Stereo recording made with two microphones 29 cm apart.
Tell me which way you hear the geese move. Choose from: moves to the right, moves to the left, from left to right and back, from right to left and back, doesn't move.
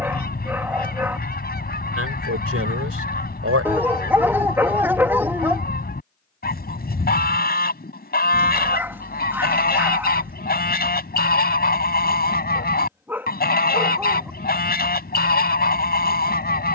doesn't move.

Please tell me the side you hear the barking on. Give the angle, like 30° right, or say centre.
10° right.